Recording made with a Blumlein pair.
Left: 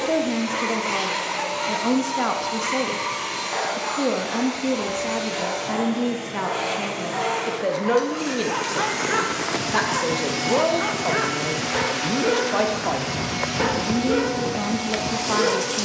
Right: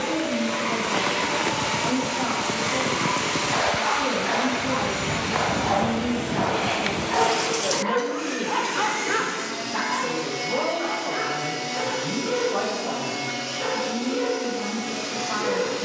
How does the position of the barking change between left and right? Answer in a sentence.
In this clip you hear the barking go right and come back.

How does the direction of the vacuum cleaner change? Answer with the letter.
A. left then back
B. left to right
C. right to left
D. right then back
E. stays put
E.